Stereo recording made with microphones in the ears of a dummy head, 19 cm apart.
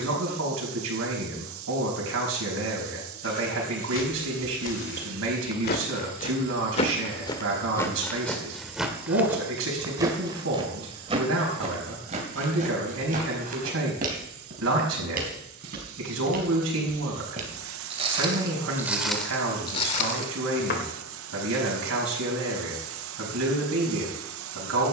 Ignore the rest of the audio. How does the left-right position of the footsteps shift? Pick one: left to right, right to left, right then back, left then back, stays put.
right then back.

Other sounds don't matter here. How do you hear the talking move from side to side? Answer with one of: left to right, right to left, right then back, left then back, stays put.
stays put.